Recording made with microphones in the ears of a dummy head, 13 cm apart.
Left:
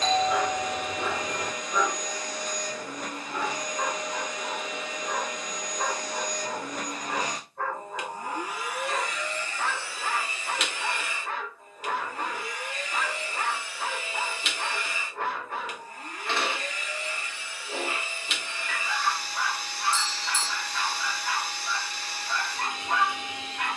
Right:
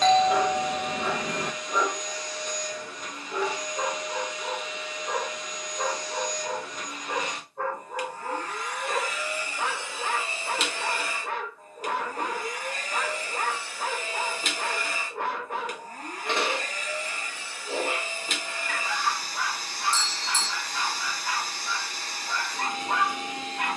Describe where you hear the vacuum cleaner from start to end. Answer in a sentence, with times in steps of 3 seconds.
You can hear the vacuum cleaner on the left from 0 s and on the right from 9 s.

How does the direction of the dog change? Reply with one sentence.
In this clip you hear the dog stay in one place.